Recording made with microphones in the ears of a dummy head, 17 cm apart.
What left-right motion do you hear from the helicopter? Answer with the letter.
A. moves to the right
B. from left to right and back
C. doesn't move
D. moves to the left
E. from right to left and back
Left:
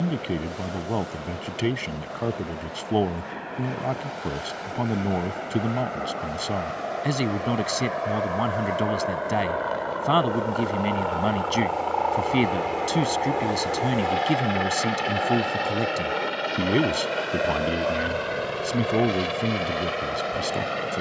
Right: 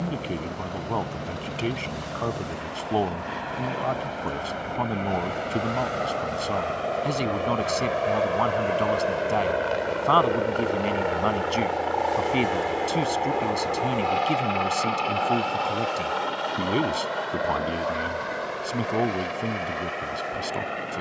D.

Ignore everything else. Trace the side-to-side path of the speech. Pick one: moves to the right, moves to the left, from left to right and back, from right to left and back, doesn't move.
doesn't move.